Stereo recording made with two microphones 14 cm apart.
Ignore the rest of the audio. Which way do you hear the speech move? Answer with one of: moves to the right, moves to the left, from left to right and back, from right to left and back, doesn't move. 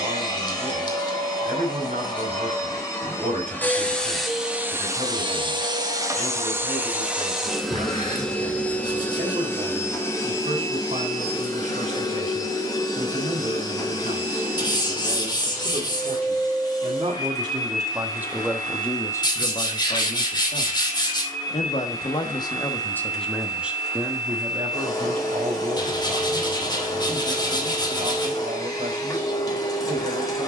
from right to left and back.